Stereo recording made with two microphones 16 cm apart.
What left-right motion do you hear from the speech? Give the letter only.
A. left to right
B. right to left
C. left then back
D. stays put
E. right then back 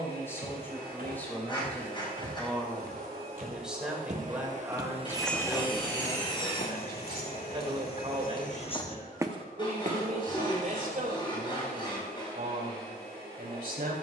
A.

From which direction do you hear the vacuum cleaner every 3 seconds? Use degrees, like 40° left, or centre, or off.
70° right, 40° right, 60° left, 80° left, 80° left.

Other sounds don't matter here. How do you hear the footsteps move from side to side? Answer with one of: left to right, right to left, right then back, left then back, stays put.
left then back.